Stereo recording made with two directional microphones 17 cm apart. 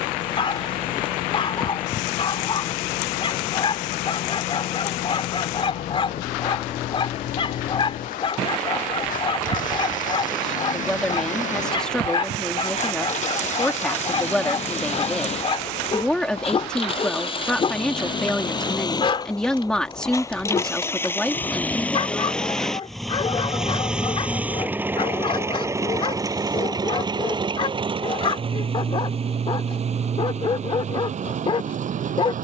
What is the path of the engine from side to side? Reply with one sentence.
In this clip you hear the engine go from the left side to the right.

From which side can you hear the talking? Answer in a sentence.
You can hear the talking in the centre.